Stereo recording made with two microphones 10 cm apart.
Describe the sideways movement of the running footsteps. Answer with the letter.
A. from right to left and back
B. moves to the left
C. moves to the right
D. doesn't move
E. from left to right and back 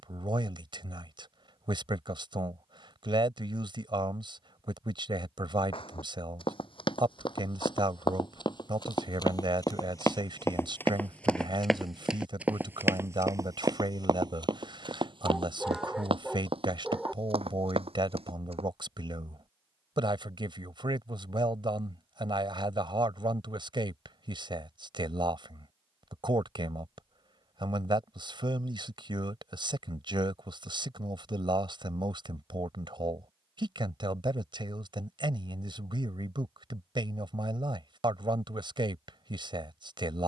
C.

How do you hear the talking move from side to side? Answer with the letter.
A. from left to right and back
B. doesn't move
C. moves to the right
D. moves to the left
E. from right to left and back
B.